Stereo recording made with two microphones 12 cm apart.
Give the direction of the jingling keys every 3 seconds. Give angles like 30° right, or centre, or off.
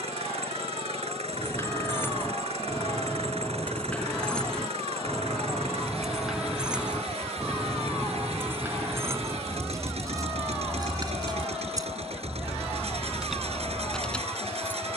20° left, 10° left, 10° right, 30° right, 10° right.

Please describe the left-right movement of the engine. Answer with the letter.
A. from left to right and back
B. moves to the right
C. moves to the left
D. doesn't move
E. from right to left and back
D.